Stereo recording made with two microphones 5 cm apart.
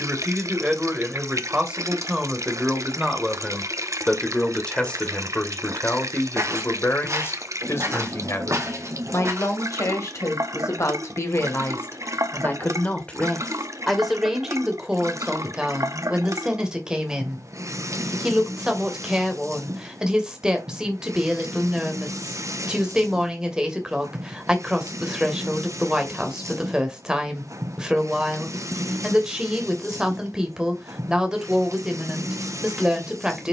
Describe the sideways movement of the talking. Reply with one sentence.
You can hear the talking go left and come back.